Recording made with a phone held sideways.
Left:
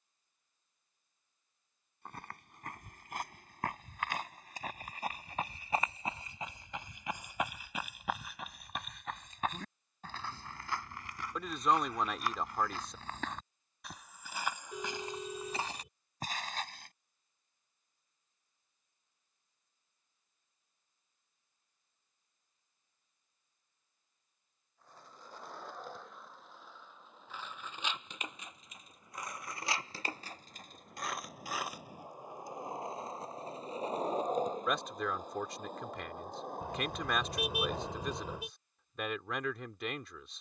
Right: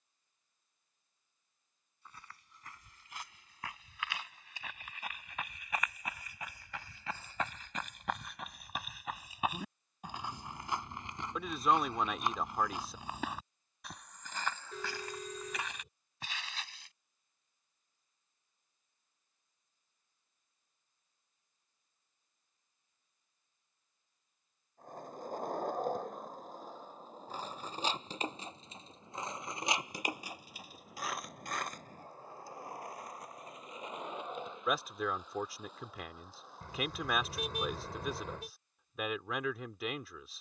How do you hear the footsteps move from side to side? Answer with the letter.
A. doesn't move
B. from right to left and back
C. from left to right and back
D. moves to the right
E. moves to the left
C.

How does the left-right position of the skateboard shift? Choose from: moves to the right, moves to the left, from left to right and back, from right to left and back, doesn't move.
moves to the left.